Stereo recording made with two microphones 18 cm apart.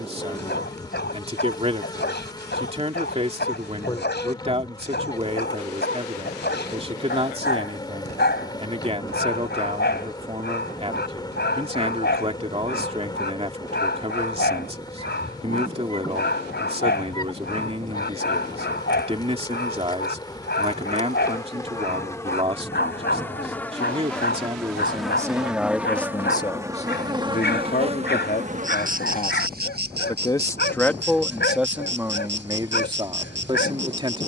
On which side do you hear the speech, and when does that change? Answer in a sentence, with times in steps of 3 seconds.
You can hear the speech on the right from 0 s, in the centre from 24 s, on the left from 27 s, in the centre from 30 s and on the right from 33 s.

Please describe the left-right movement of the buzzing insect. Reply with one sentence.
You can hear the buzzing insect move to the right.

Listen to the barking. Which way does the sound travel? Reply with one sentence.
In this clip you hear the barking stay in one place.